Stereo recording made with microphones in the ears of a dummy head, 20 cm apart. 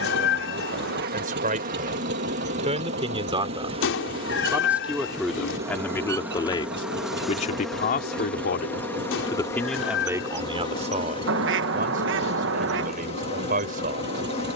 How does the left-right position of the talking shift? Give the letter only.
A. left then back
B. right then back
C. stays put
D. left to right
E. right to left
A.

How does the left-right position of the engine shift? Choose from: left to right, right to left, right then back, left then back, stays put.
stays put.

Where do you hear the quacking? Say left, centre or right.
right.